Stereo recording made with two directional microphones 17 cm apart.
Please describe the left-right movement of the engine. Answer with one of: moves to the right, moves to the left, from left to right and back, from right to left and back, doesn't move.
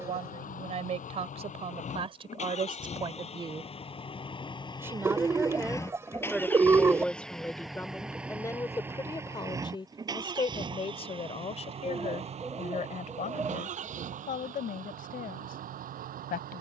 moves to the right.